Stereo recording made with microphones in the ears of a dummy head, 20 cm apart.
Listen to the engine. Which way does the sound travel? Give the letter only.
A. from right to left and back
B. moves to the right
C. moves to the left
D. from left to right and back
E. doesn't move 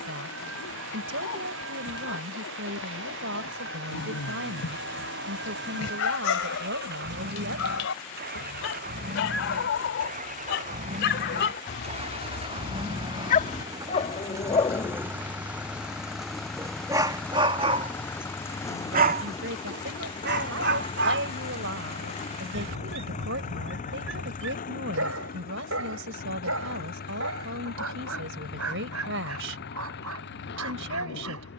C.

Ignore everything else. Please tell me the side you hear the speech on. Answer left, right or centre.
right.